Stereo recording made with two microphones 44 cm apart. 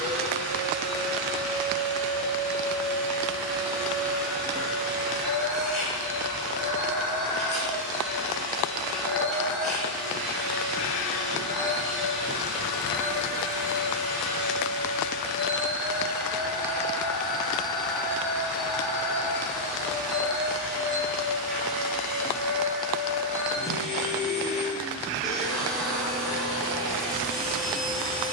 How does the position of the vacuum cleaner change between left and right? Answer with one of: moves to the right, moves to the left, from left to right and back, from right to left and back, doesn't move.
doesn't move.